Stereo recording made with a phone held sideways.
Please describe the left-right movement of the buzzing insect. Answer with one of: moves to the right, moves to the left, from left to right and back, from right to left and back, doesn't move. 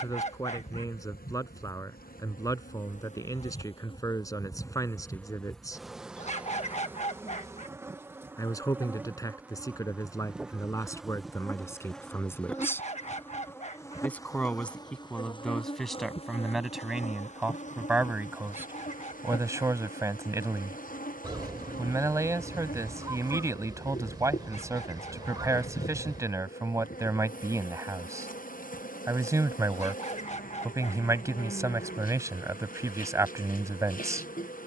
from left to right and back.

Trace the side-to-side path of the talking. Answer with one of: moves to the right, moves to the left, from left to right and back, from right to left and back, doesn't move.
moves to the right.